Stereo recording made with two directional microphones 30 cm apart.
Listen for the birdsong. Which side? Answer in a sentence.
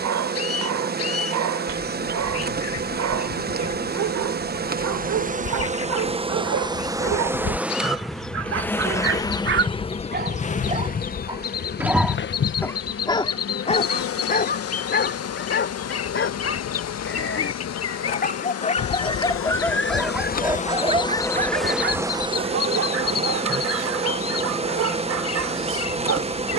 You can hear the birdsong on the left.